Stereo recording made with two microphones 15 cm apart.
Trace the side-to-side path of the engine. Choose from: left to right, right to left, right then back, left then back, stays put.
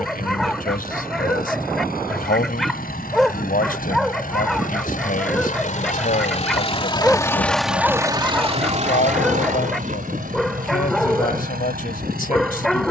left to right.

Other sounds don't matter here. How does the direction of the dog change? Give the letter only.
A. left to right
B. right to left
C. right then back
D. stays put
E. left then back
D.